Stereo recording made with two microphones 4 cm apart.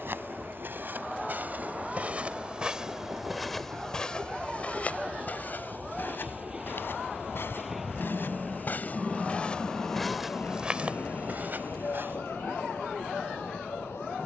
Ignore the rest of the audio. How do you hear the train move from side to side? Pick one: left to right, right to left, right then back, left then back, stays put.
right to left.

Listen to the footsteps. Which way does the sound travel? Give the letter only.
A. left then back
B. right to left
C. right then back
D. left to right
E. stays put
A.